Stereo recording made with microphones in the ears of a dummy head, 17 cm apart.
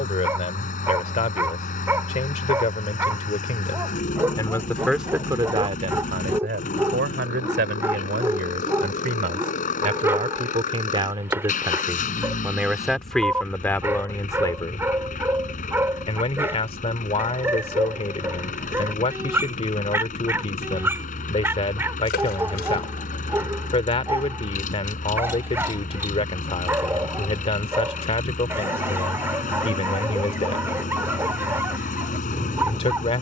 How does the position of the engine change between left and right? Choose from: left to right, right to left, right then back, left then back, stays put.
stays put.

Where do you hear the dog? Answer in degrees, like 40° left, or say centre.
10° right.